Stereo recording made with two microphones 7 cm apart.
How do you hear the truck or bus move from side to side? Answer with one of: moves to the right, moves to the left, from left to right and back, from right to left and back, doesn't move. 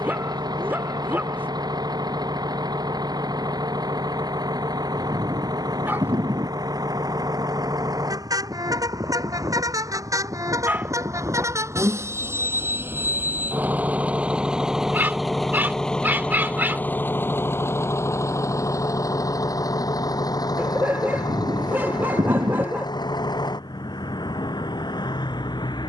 moves to the left.